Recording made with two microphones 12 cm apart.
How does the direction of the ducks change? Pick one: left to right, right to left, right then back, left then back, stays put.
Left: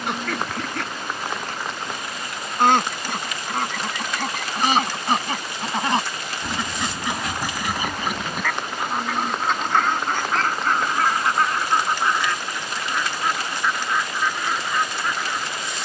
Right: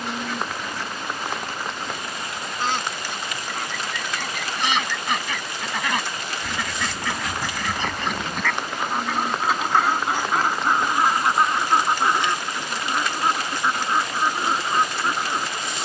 left to right.